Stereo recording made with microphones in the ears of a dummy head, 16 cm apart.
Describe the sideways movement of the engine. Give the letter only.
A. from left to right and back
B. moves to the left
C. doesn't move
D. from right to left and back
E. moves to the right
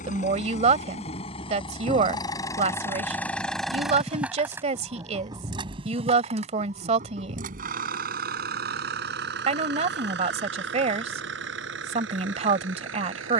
E.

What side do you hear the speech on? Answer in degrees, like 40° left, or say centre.
40° right.